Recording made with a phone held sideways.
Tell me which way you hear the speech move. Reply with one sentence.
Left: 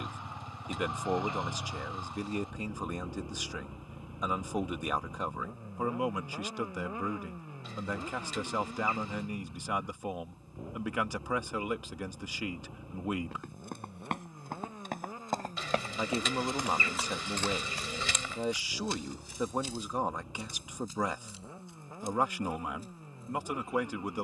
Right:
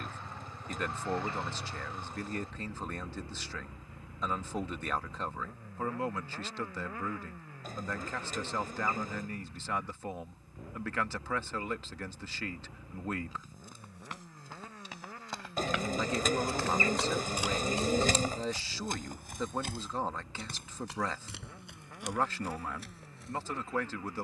In this clip you hear the speech stay put.